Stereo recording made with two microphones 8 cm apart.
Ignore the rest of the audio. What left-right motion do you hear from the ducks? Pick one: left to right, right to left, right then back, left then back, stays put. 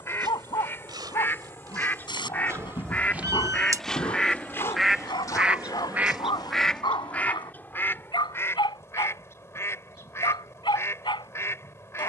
right then back.